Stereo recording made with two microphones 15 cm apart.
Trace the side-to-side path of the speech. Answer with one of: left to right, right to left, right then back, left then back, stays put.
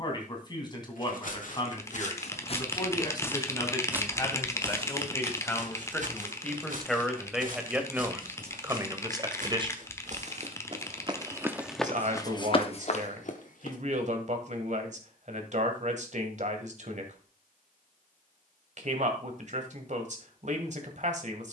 left to right.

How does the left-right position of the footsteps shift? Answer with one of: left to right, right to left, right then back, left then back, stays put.
right then back.